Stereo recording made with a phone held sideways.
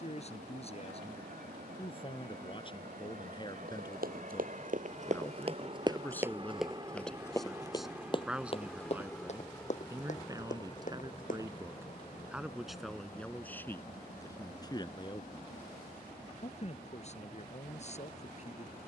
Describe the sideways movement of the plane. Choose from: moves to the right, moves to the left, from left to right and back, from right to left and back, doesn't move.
moves to the left.